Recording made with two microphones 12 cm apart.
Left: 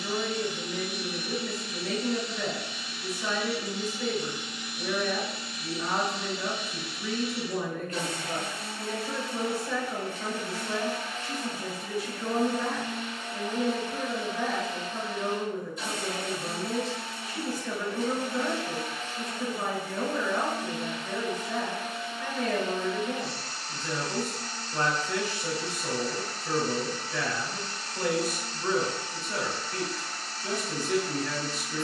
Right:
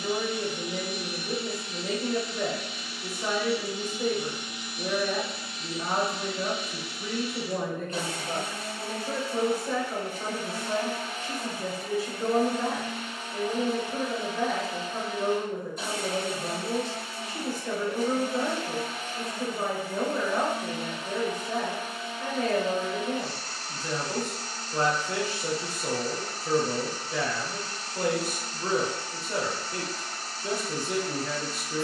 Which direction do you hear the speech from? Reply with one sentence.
In this clip you hear the speech on the right.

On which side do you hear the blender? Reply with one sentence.
You can hear the blender on the right.